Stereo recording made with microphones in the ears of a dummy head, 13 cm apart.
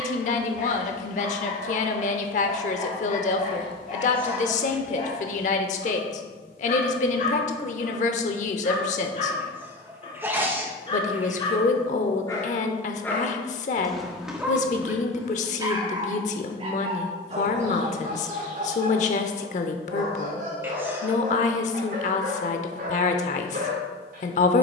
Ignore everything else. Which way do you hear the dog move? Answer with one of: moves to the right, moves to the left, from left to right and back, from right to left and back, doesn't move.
moves to the right.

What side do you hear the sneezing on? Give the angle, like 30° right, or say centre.
20° right.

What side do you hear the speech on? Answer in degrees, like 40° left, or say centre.
50° left.